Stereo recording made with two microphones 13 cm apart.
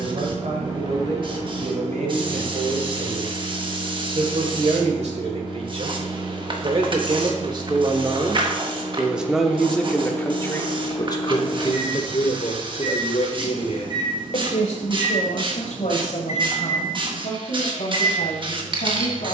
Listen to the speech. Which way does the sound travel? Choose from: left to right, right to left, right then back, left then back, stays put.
right to left.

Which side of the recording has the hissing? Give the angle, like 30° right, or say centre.
40° right.